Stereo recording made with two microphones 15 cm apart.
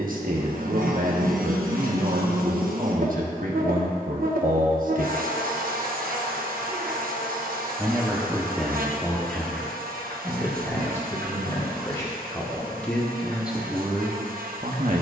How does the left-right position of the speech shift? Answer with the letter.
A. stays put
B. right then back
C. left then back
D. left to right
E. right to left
C.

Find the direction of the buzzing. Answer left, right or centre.
right.